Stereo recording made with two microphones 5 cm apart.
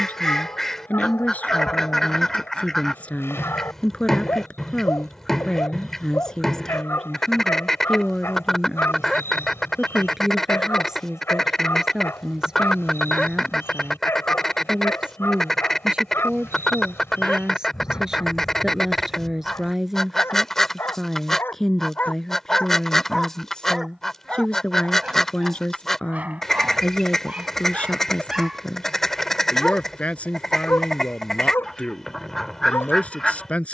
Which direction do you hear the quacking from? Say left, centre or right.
centre.